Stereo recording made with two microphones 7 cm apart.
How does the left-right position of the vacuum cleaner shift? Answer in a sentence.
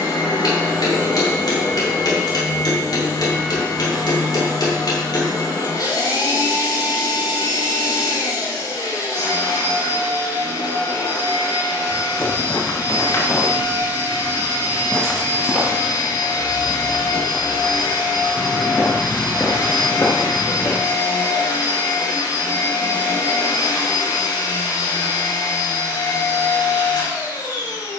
In this clip you hear the vacuum cleaner stay put.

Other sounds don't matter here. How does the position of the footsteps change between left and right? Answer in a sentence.
You can hear the footsteps go right and come back.